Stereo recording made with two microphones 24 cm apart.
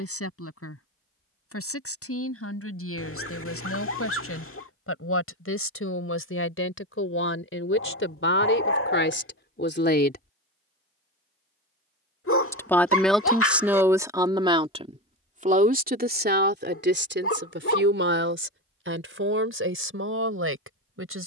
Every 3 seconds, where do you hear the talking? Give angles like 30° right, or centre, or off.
70° left, 70° left, 60° left, 50° left, 10° right, 40° right, 60° right.